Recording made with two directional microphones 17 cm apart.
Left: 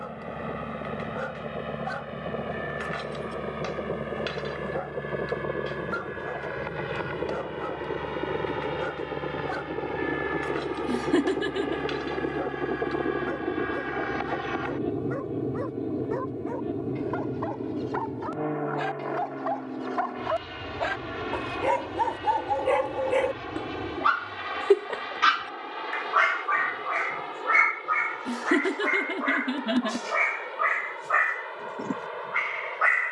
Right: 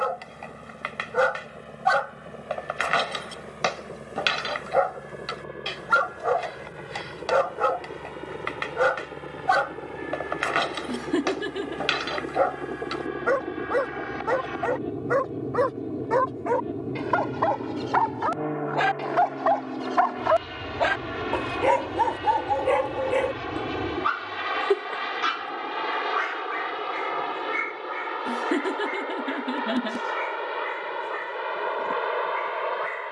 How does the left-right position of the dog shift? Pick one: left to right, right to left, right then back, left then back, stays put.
right to left.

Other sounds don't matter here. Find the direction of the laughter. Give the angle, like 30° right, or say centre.
10° left.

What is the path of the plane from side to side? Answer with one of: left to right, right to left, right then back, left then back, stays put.
left to right.